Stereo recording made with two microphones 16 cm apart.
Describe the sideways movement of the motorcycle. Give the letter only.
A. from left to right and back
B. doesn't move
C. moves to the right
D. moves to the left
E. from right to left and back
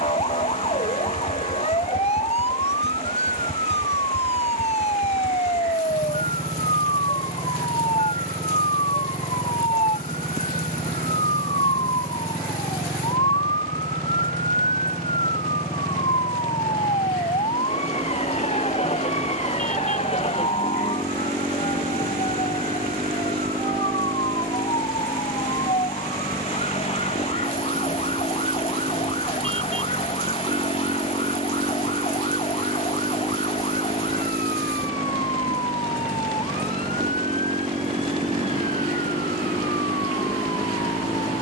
B.